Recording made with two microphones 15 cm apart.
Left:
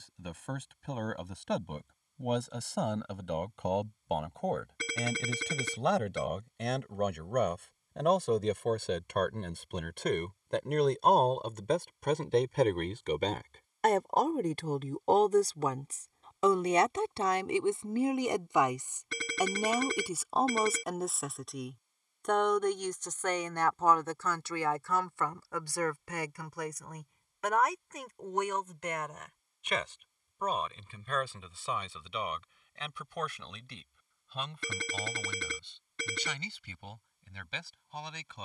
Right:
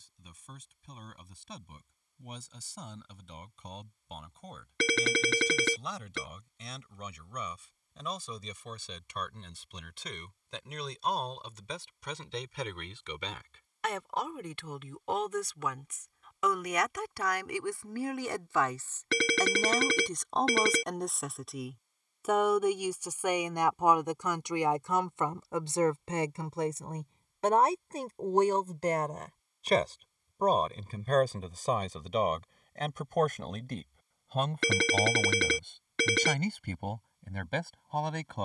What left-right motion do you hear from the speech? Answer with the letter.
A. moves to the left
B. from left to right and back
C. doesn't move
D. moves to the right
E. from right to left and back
D.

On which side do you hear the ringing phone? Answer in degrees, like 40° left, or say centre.
80° right.